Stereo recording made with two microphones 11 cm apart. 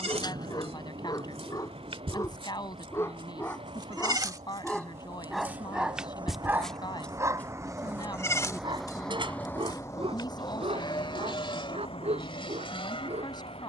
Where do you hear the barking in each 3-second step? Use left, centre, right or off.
left, centre, right, right, right.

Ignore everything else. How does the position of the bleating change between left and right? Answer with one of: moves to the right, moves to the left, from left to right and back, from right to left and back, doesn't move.
moves to the left.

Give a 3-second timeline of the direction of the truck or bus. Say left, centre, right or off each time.
right, right, right, left, left.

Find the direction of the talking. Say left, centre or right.
left.